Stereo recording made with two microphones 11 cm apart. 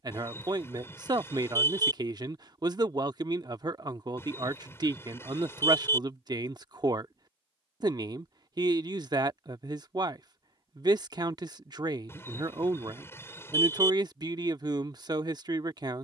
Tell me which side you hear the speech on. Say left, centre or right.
right.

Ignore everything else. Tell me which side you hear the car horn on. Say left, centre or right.
left.